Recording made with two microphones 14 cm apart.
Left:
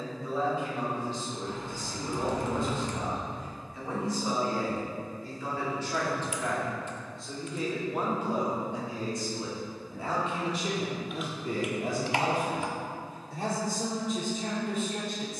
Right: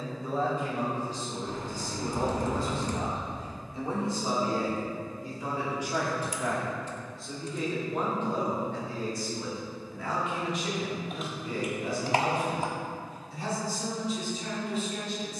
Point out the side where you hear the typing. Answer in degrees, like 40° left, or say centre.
40° right.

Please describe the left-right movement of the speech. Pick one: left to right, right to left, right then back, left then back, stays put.
right to left.